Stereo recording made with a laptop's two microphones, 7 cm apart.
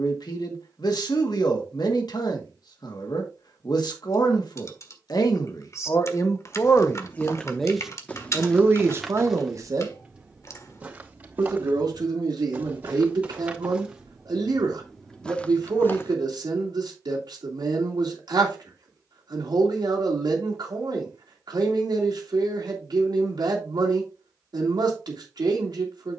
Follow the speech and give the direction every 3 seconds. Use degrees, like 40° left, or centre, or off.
70° left, 60° left, 10° left, 50° right, 70° right, 70° right, 70° right, 70° right, 70° right.